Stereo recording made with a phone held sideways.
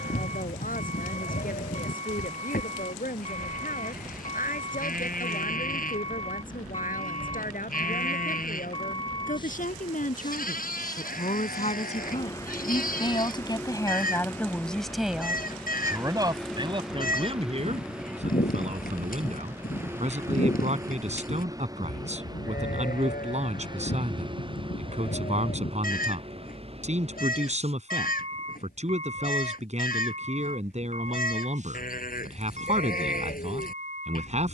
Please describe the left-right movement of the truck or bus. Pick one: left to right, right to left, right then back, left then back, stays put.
left to right.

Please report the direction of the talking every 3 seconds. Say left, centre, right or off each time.
left, left, left, left, left, right, right, right, right, right, right, right.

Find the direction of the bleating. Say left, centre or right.
left.